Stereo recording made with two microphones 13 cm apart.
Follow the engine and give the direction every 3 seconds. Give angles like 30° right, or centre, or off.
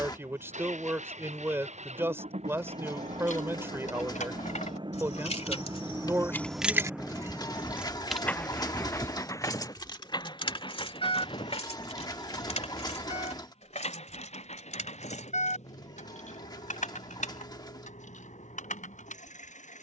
60° right, 40° right, centre, 30° left, 50° left, 60° left, 60° left.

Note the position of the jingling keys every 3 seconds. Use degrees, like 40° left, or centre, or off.
off, 60° left, centre, 40° left, 60° left, 70° left, 70° left.